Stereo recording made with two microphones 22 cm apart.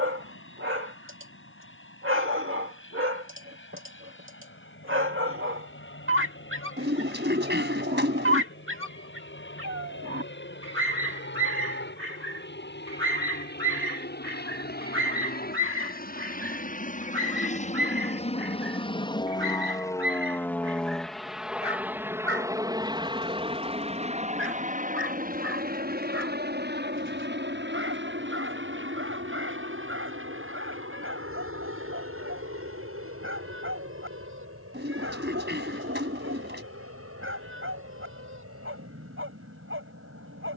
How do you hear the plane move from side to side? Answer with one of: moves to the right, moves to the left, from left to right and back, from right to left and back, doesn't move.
moves to the right.